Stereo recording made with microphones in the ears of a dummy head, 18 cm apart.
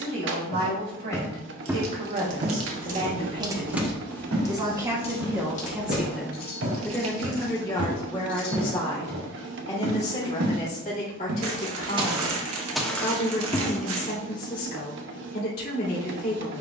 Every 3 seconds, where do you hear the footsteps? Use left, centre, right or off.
centre, right, right, right, centre, off.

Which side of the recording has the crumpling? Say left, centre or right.
right.